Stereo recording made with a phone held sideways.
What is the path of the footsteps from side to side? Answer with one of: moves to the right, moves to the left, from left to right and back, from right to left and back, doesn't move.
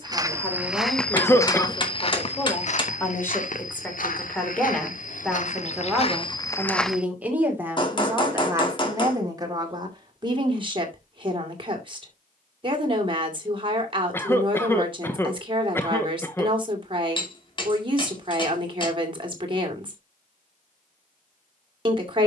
from right to left and back.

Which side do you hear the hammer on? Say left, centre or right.
left.